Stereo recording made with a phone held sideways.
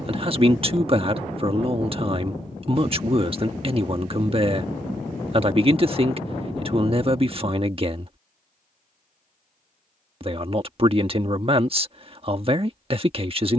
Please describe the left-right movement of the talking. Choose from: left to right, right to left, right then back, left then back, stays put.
stays put.